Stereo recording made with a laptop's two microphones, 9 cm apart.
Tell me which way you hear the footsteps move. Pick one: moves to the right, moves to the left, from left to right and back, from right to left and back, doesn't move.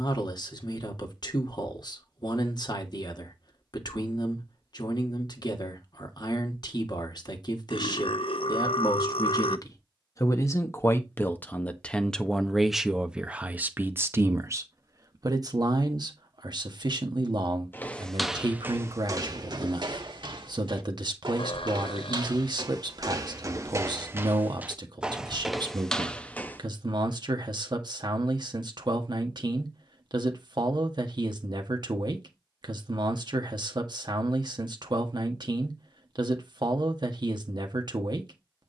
from left to right and back.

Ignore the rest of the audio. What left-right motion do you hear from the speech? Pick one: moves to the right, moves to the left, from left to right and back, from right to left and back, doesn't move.
moves to the right.